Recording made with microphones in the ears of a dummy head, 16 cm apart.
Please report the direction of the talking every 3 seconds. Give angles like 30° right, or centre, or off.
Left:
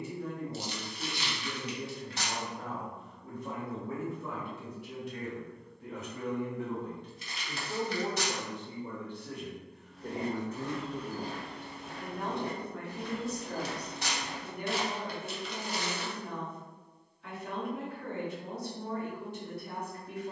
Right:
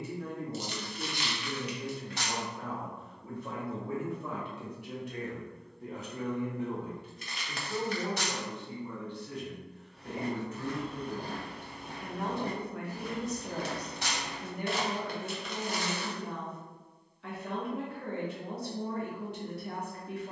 60° right, 50° right, 10° left, 30° left, 20° right, 50° right, 50° right.